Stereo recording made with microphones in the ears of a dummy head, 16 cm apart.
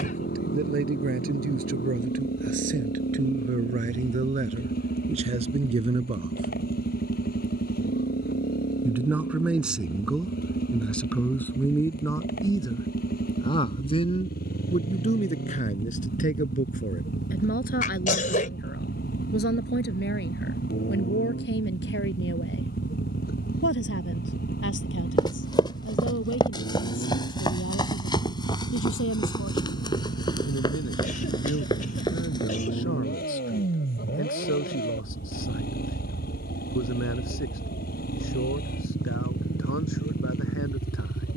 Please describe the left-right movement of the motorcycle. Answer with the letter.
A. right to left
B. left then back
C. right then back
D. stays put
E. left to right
D.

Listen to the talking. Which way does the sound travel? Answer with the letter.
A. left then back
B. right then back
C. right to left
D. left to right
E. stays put
C.